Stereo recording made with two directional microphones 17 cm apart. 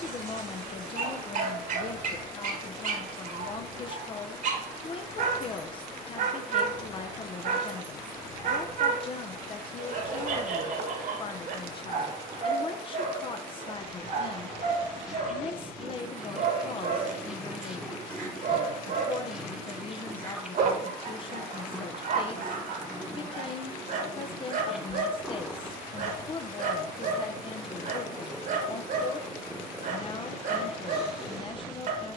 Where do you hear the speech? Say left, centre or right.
left.